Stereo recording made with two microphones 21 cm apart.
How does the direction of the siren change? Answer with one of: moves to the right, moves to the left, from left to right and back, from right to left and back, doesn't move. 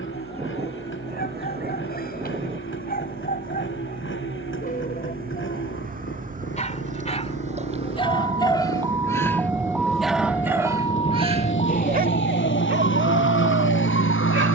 moves to the left.